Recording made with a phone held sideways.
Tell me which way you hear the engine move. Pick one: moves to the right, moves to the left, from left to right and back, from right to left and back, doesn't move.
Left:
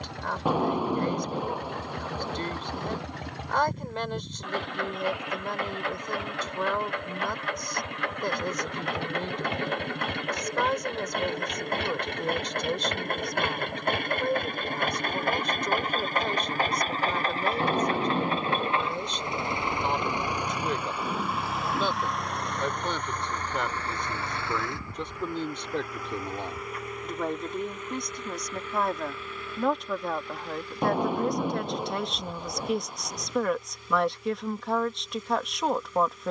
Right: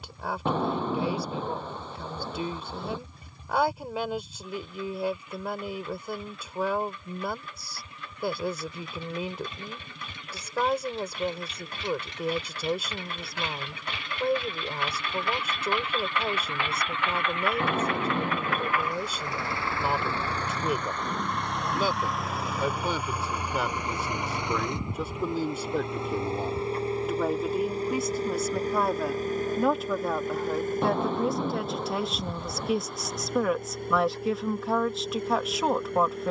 moves to the right.